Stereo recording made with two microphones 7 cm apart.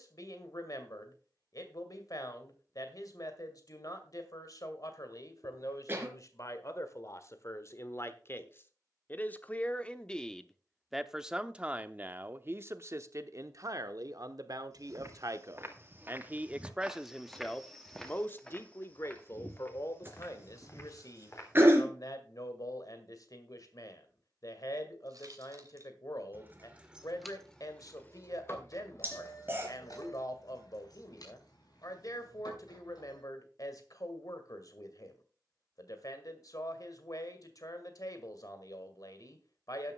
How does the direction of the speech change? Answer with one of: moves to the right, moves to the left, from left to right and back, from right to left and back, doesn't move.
from left to right and back.